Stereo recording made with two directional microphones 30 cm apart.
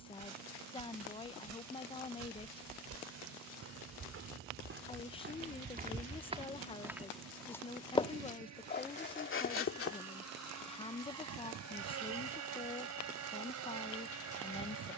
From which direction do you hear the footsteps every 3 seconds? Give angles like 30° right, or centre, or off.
60° right, 40° right, centre, 40° left, off.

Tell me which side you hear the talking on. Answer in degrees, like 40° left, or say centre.
20° left.